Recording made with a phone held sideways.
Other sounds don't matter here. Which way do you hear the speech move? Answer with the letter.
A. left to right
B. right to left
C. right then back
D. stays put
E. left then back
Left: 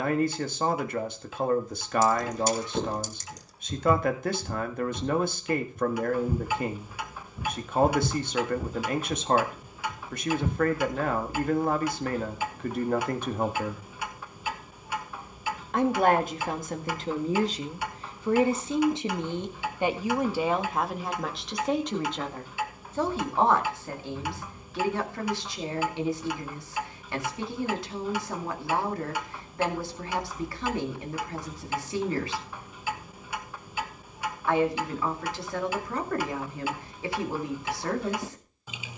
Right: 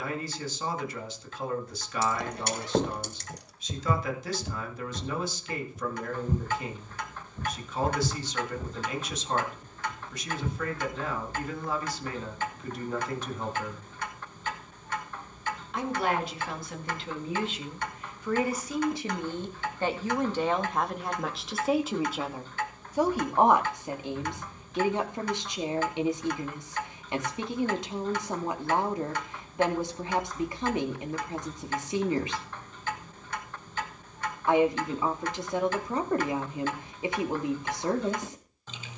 A.